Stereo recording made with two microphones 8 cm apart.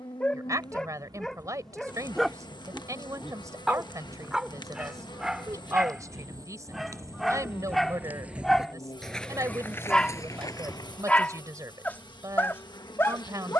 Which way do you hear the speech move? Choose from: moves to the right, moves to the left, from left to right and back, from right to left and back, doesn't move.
doesn't move.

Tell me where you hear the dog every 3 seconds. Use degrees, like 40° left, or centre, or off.
10° left, 10° right, centre, 20° left, 30° left.